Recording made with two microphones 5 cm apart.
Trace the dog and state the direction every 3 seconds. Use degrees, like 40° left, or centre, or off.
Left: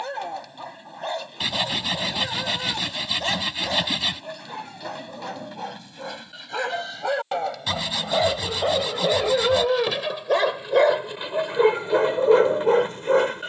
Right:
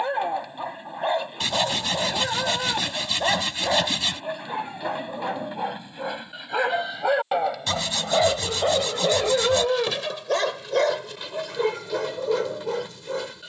20° right, 20° right, 10° right, 10° left, 40° left.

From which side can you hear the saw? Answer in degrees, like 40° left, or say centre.
10° left.